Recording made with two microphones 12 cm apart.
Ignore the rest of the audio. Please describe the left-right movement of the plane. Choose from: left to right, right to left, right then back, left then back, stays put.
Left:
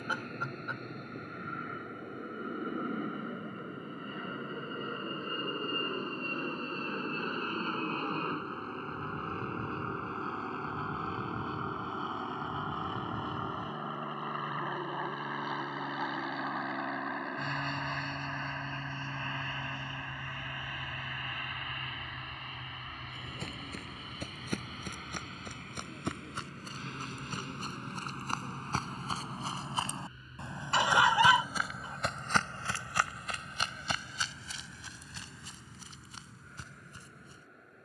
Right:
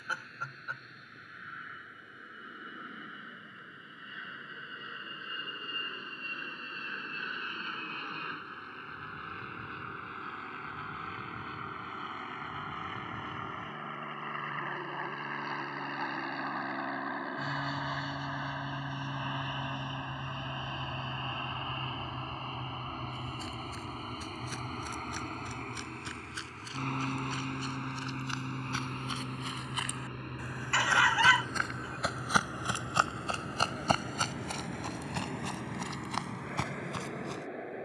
left to right.